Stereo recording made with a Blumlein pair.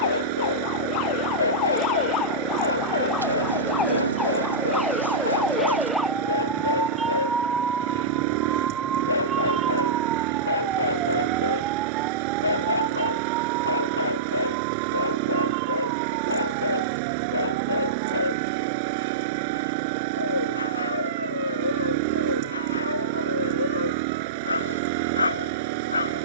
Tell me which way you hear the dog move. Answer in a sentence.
You can hear the dog stay put.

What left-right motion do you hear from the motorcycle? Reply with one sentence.
You can hear the motorcycle stay in one place.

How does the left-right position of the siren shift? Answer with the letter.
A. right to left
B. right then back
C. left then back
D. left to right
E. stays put
D.